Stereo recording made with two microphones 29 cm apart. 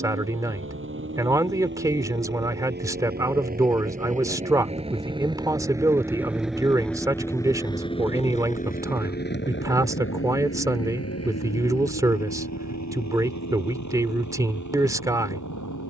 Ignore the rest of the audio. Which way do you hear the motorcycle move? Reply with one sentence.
In this clip you hear the motorcycle move to the left.